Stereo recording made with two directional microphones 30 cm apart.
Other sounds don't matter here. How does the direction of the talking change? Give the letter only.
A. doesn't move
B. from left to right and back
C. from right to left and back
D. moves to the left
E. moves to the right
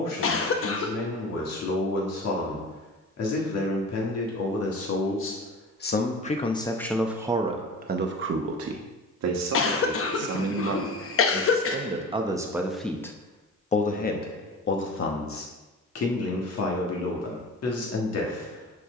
B.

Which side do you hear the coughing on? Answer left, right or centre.
left.